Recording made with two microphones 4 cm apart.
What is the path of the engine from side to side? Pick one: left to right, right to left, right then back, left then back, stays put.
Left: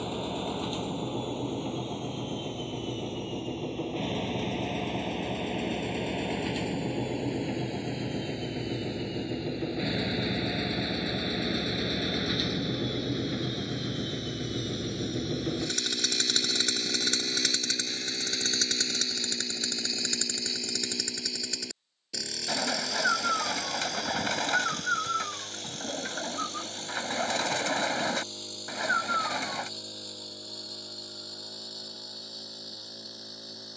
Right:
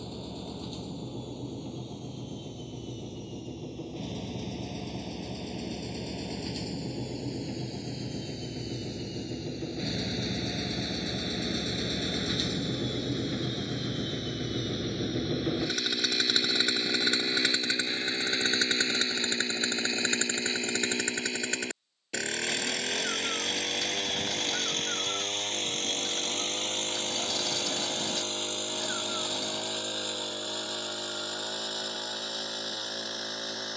left to right.